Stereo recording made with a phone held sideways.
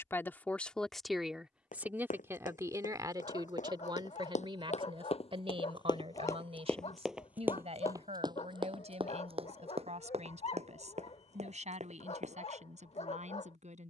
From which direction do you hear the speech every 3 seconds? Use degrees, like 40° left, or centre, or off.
10° right, 40° right, 50° right, 60° right, 60° right.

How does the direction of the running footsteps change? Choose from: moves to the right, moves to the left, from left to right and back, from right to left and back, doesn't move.
moves to the right.